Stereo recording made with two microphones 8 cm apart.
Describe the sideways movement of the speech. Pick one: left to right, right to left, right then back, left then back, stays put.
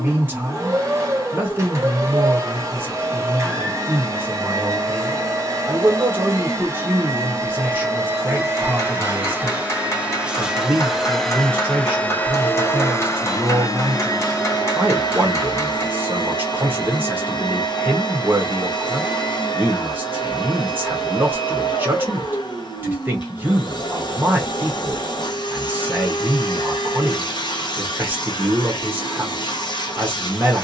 stays put.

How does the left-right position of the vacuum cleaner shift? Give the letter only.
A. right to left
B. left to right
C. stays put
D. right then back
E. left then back
A.